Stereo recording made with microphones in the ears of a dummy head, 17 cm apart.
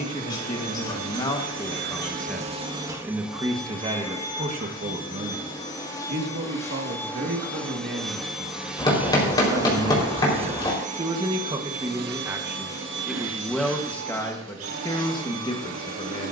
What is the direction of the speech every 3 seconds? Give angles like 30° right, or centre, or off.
20° left, 30° right, 50° right, 30° right, centre, 30° left.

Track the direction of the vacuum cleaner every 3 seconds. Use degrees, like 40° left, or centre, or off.
60° right, 10° left, 10° left, 30° right, 70° right, 80° right.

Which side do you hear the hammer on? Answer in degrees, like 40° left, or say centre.
20° left.